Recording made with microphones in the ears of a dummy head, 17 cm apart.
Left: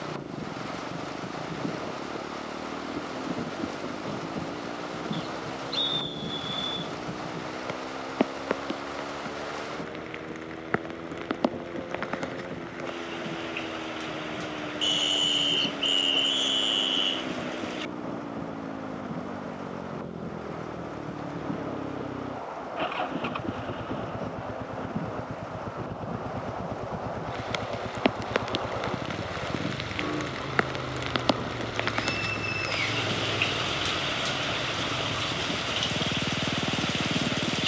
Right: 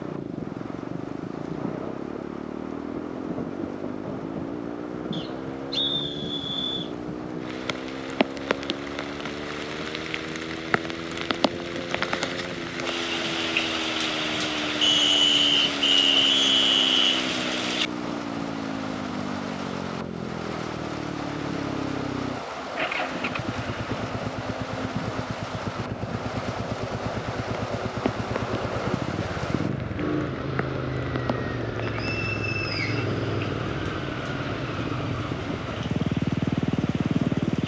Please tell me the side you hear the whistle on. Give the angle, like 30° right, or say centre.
centre.